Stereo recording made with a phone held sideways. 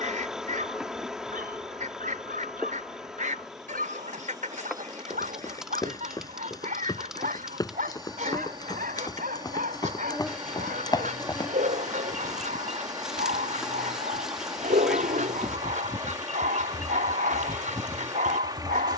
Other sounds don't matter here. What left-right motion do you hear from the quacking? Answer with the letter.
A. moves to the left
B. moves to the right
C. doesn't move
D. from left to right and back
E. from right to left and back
C.